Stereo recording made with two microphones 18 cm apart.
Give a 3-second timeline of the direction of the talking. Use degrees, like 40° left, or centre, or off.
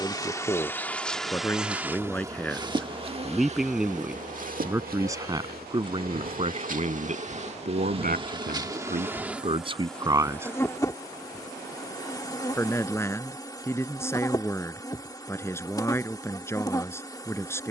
10° left, 10° right, 50° right, 30° right, 10° left, 10° left.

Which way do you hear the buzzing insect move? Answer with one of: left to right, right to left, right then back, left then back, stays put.
right then back.